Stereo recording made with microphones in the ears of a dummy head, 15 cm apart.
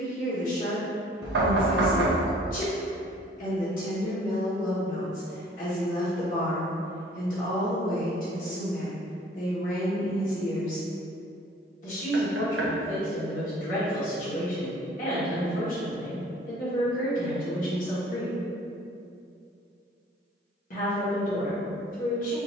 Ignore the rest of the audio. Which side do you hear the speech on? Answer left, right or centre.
left.